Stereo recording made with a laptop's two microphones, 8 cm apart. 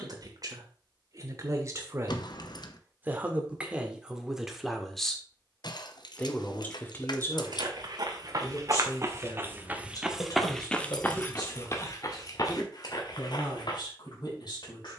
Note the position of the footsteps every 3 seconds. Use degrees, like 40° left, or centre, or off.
off, off, 50° right, centre, 50° left.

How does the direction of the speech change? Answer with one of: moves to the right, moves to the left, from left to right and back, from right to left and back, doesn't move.
moves to the left.